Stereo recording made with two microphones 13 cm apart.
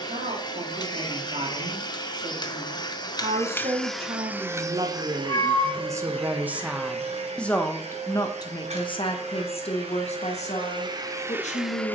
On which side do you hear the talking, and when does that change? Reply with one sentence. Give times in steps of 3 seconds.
You can hear the talking on the right from 0 s, in the centre from 6 s and on the left from 9 s.